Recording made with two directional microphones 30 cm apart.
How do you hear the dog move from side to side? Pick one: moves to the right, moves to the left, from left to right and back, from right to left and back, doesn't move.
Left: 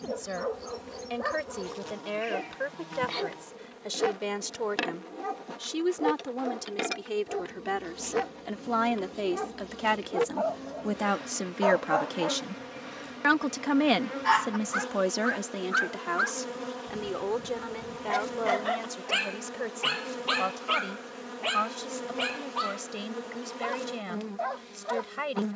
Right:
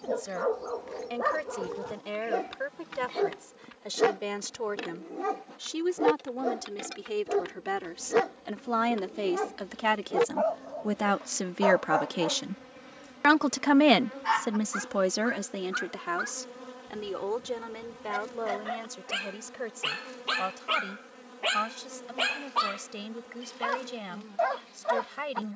from right to left and back.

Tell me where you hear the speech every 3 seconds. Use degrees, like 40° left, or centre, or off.
20° left, 10° left, 10° left, centre, 10° right, 10° left, 20° left, 20° left, 20° left.